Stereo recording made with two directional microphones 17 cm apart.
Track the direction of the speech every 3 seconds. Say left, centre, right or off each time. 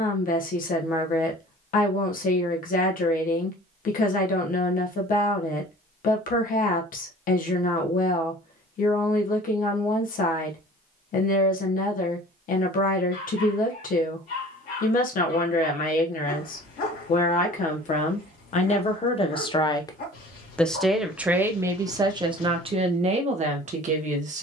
left, left, left, left, left, left, left, right.